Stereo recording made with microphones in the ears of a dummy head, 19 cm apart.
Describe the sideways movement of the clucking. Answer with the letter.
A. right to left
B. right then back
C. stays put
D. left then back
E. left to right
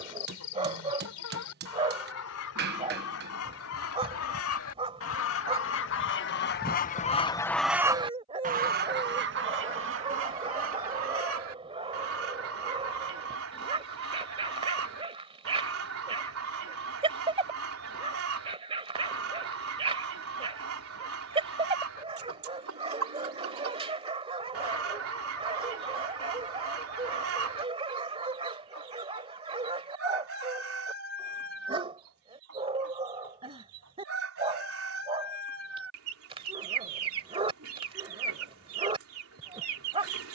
E.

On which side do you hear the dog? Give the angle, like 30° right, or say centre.
30° right.